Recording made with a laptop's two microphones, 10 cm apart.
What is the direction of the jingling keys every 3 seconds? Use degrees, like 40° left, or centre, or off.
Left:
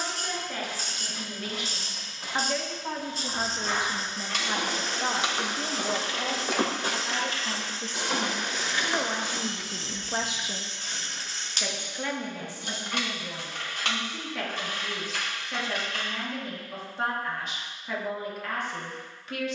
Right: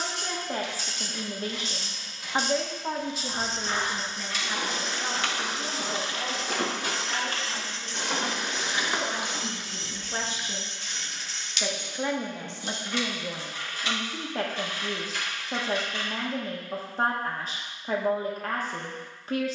off, 20° left, 30° right, 10° left, 60° left, 70° left, off.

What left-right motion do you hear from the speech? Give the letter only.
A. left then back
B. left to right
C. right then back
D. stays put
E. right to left
A.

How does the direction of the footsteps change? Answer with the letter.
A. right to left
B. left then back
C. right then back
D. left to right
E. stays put
D.